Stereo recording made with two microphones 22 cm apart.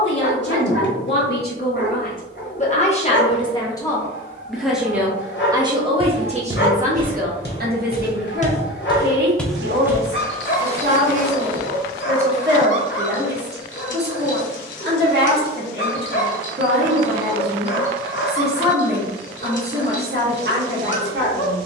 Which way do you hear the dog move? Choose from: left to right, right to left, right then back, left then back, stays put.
stays put.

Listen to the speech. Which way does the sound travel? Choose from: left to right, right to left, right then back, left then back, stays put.
left to right.